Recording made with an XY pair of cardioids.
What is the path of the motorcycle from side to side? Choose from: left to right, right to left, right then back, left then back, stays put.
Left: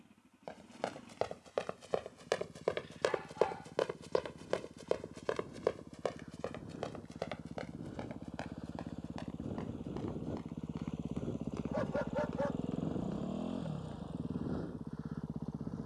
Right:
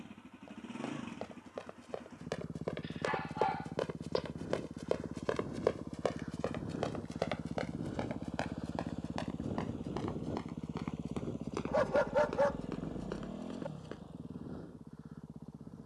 right to left.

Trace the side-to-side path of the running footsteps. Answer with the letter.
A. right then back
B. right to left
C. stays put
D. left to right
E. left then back
D.